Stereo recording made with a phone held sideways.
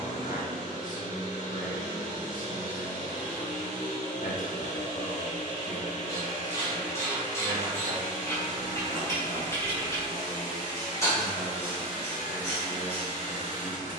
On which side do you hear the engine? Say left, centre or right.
left.